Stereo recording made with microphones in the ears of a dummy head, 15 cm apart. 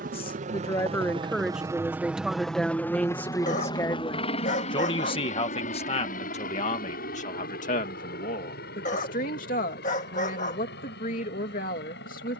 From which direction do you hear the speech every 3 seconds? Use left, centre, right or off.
centre, left, left, left.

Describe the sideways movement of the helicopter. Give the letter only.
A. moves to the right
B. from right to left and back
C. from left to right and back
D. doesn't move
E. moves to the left
E.